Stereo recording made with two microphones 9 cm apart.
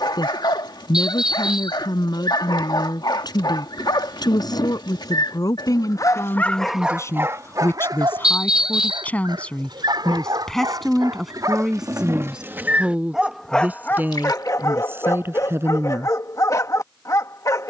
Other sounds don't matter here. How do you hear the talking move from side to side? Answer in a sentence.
In this clip you hear the talking move from left to right.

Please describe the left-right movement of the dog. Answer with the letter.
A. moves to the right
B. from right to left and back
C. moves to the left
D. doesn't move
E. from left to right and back
E.